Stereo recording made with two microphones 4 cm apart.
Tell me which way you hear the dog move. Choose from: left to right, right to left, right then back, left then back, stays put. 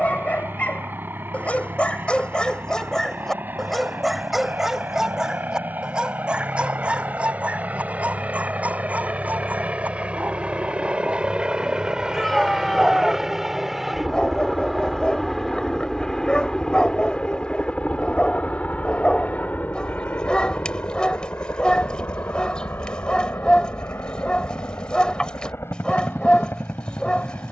right then back.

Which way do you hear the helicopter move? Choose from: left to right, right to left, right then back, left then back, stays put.
right to left.